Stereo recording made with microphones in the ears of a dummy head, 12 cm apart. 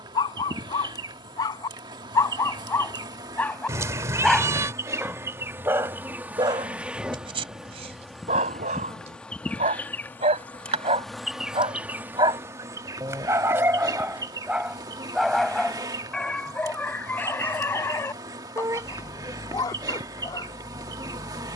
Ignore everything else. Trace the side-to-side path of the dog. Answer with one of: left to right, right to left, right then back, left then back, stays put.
right then back.